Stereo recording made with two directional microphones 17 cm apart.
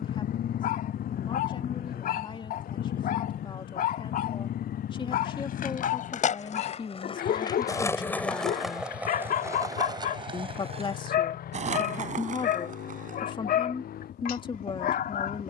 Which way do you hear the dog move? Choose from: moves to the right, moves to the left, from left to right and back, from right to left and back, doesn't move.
doesn't move.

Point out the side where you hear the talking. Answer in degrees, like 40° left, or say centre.
30° left.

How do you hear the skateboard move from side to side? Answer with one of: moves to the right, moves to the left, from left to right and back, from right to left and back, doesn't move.
moves to the right.